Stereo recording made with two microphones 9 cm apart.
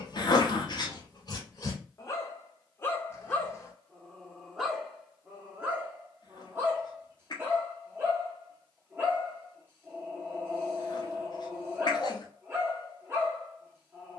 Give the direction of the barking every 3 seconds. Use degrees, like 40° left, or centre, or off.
40° left, centre, 30° right, 30° right, 30° right.